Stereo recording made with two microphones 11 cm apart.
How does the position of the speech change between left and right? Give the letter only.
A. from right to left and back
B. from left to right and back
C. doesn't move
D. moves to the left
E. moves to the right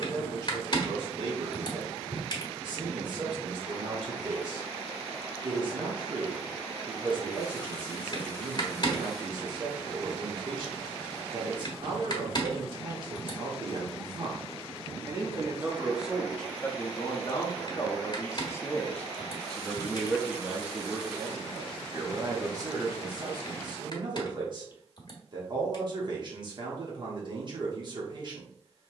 A.